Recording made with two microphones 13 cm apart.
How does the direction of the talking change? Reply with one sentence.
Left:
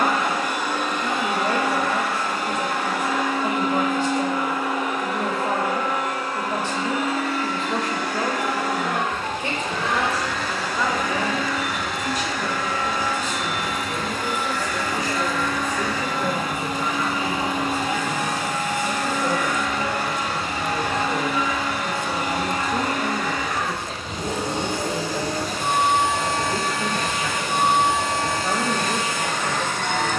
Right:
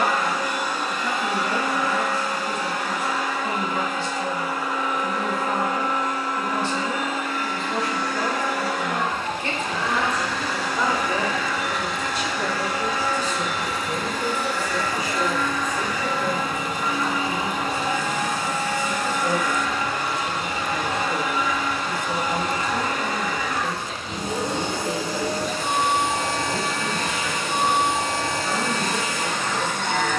You can hear the talking move from left to right and back again.